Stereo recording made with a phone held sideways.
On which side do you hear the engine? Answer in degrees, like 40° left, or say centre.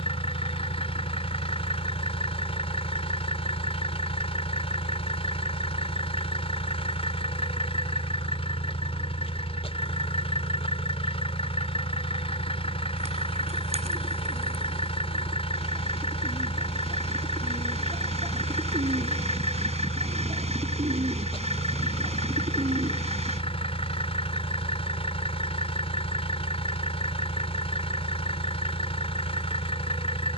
40° left.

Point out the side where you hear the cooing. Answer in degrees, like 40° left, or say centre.
40° right.